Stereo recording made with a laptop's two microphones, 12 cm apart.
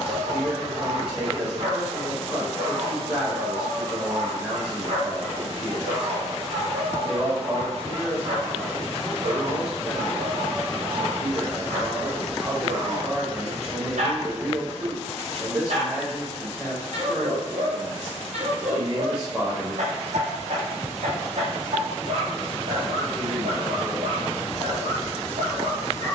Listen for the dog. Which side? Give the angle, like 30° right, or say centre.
70° right.